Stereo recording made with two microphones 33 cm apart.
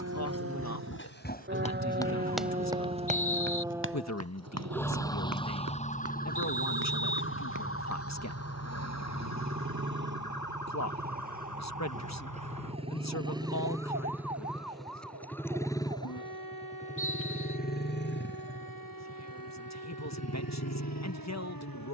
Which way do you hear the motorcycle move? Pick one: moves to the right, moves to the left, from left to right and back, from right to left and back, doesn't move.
moves to the left.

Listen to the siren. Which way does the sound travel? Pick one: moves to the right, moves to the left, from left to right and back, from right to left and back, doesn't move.
moves to the left.